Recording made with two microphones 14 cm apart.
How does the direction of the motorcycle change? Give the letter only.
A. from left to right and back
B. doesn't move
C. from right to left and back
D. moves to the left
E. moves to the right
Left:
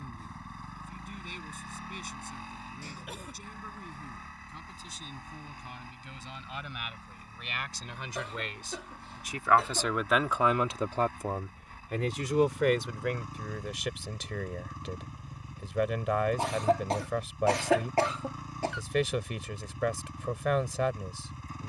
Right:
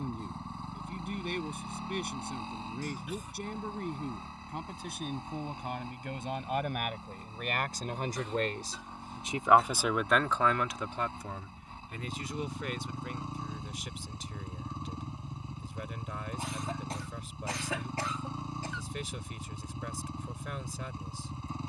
B.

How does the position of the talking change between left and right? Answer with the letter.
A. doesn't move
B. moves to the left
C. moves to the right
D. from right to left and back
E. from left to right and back
B.